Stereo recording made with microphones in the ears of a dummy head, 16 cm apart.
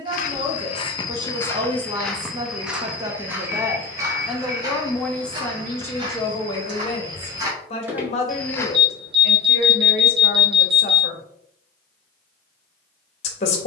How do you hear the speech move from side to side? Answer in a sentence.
In this clip you hear the speech go from the right side to the left.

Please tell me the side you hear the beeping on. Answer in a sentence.
You can hear the beeping on the right.